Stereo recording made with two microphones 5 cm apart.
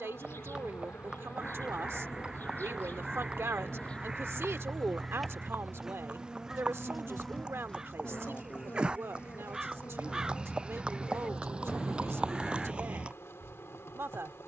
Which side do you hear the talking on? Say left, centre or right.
right.